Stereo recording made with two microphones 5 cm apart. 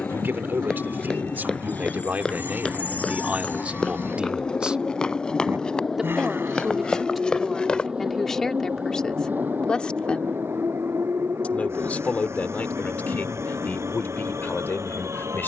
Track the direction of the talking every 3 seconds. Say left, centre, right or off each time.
right, right, centre, left, left.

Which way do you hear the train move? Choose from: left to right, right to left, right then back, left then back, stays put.
left to right.